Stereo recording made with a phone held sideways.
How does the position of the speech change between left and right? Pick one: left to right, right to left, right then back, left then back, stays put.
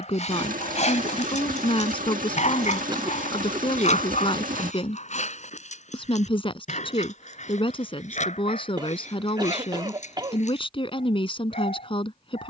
stays put.